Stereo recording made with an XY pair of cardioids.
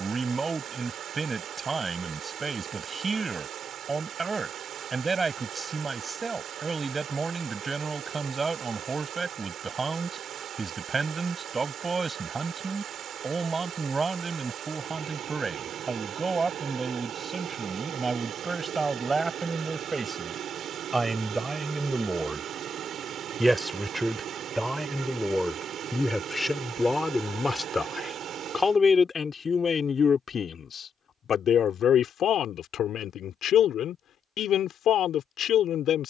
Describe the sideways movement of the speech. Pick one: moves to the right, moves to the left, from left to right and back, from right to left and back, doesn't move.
moves to the left.